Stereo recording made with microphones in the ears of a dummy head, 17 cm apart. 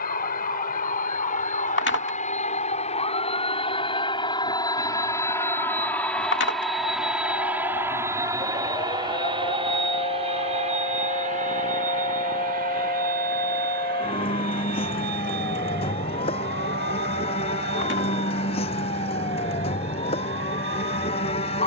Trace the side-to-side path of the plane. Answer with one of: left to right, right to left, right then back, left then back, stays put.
left to right.